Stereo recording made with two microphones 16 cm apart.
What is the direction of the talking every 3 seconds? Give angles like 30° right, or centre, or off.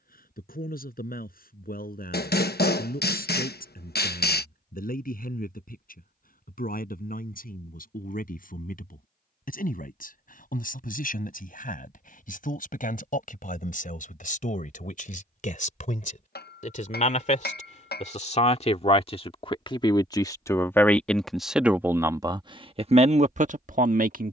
60° left, 60° left, 60° left, 60° left, 60° left, 50° left, 30° left, 30° right.